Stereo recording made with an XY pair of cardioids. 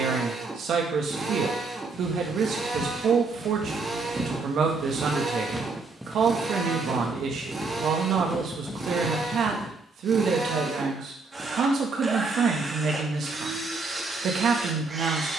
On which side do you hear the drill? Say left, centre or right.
right.